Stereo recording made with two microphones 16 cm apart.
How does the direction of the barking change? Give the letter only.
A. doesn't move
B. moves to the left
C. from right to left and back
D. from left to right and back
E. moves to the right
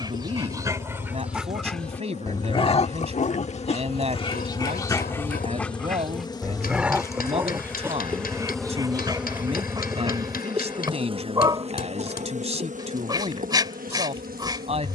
C.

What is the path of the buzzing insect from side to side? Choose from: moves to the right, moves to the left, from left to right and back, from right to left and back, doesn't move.
moves to the right.